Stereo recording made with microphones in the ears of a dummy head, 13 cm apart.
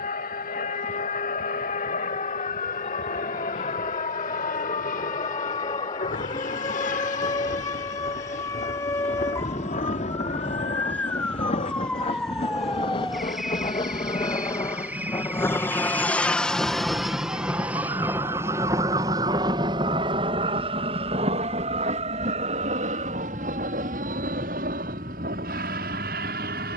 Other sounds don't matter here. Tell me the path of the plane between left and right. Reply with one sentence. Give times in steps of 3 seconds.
You can hear the plane on the left from 0 s, in the centre from 15 s and on the right from 18 s.